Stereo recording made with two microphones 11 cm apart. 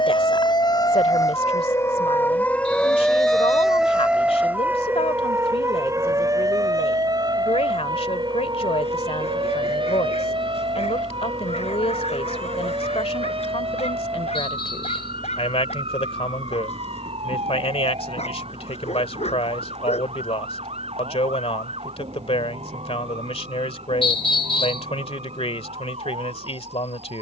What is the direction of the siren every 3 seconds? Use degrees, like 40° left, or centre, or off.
30° left, 10° right, 40° right, 50° right, 50° right, 60° right, 60° right, 60° right, 60° right.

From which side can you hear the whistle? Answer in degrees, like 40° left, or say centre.
50° left.